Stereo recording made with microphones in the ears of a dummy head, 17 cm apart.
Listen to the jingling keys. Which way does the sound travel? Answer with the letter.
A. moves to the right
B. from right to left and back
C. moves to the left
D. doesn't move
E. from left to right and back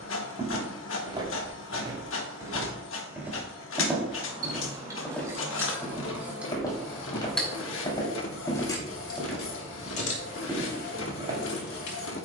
C.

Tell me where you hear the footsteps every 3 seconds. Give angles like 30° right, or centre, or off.
20° right, centre, 20° left, 10° right.